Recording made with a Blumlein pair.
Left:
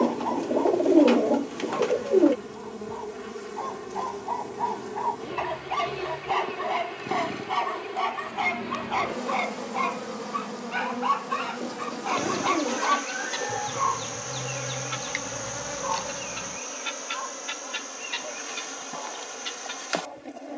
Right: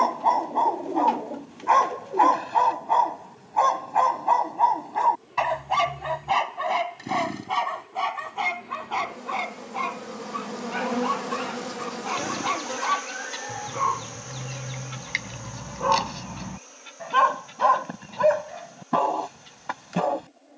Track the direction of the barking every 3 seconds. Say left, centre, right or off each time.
right, right, centre, centre, centre, right, right.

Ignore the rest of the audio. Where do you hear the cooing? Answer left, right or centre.
left.